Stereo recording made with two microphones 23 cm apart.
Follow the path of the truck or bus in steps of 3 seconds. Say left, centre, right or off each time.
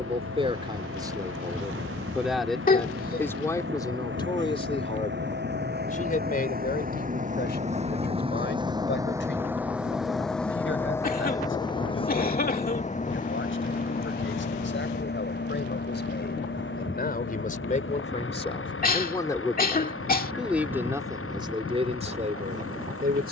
right, right, right, centre, left, left, left, left.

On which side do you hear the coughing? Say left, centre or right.
left.